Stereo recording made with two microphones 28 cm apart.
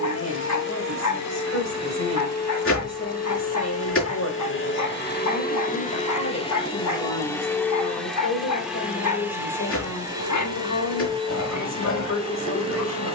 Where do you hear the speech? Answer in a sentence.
In this clip you hear the speech on the left.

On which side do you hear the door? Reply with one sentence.
You can hear the door on the left.